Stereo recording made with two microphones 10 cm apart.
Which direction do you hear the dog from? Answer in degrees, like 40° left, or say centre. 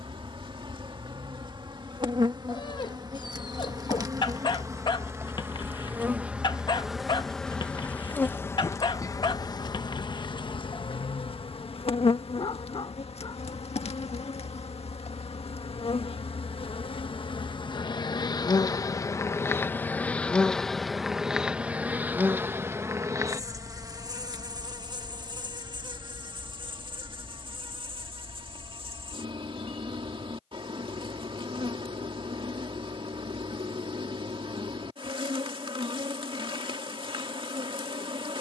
40° left.